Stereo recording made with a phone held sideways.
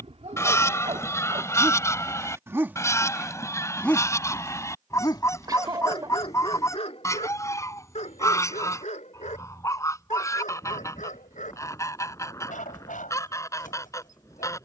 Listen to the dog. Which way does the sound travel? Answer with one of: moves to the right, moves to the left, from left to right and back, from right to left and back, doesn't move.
moves to the left.